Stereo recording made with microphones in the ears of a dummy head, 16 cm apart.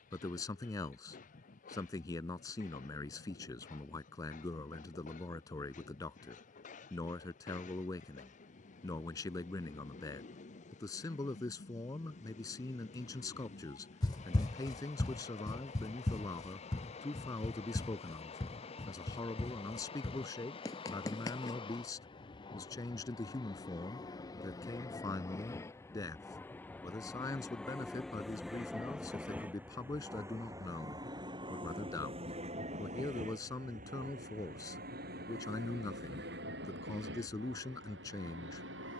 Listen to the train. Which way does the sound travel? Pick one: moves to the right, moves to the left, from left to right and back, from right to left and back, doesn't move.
moves to the right.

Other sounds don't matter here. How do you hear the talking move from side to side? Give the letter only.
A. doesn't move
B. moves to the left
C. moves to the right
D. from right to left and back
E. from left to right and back
A.